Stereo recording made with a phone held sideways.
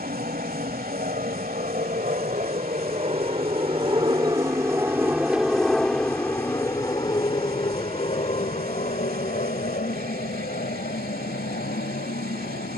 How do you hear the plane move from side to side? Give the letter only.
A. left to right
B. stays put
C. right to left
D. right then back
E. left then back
C.